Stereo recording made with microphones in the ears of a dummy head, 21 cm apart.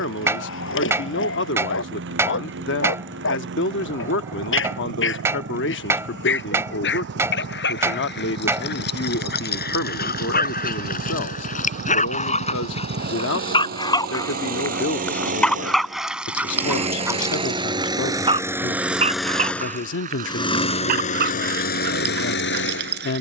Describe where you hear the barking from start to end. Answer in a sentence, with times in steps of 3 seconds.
You can hear the barking on the left from 0 s, in the centre from 15 s and on the right from 18 s.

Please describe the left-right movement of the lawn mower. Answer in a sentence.
You can hear the lawn mower travel towards the left.